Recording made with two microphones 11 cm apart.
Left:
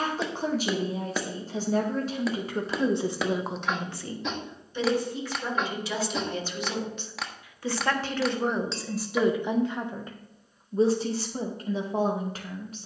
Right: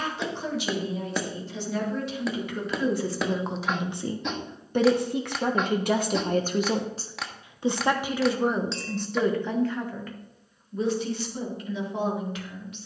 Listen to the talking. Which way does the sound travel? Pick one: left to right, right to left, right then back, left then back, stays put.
right then back.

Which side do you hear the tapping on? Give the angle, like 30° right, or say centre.
centre.